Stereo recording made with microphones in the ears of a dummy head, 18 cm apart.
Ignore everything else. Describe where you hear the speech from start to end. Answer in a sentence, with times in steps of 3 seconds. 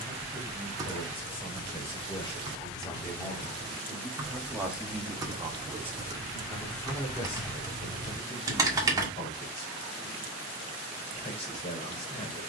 You can hear the speech on the left from 0 s, in the centre from 3 s and on the left from 6 s.